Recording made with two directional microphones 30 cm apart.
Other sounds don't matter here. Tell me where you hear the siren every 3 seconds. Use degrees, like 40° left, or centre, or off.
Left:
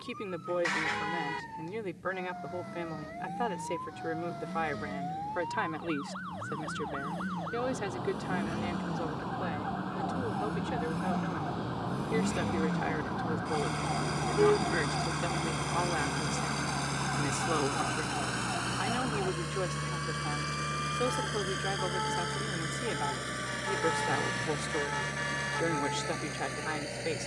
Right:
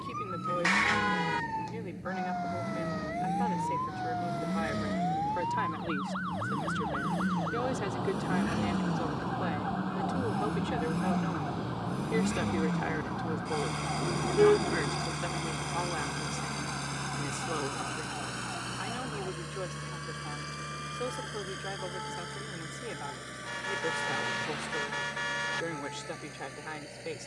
60° right, 50° right, 30° right, centre, 20° left, 30° left, 40° left, 50° left, 50° left.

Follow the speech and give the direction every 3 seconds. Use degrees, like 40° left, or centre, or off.
30° left, 30° left, 10° left, 10° right, centre, 20° left, 30° left, 30° left, 30° left.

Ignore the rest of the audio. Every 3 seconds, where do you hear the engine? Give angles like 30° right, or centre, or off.
60° right, 60° right, 50° right, 30° right, 10° right, 10° left, 30° left, 40° left, 50° left.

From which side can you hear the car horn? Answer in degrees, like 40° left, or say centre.
30° right.